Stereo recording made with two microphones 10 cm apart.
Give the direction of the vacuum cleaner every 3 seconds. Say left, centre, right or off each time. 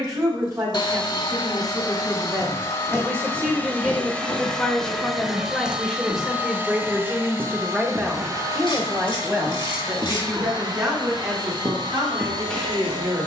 left, centre, right, right, right.